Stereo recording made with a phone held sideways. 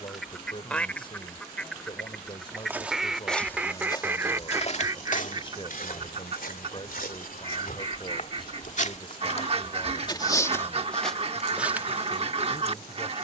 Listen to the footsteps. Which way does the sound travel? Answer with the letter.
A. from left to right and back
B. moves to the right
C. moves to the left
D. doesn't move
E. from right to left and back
E.